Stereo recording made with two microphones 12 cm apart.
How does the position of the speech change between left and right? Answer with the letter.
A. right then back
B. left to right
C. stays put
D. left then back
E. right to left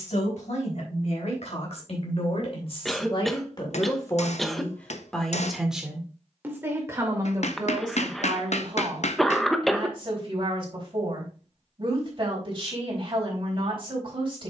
B.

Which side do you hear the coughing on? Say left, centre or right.
centre.